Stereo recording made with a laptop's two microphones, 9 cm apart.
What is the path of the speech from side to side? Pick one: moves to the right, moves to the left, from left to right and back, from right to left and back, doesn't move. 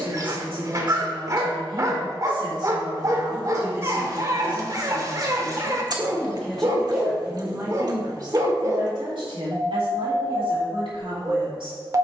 from right to left and back.